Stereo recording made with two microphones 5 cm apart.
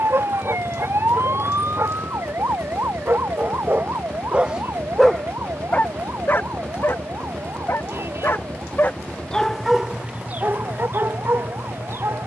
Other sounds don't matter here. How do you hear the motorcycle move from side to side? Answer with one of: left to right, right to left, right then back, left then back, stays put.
stays put.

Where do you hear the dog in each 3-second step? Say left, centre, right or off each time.
right, right, left, right.